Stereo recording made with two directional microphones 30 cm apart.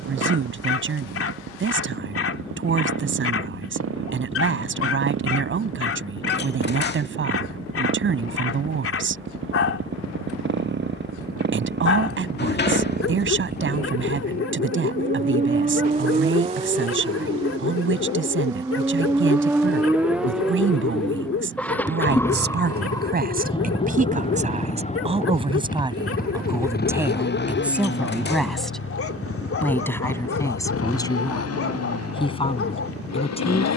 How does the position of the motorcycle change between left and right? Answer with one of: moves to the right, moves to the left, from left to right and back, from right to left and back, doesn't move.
moves to the left.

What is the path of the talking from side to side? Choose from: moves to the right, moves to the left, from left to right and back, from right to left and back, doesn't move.
moves to the left.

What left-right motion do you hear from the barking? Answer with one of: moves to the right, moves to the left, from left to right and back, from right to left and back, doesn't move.
doesn't move.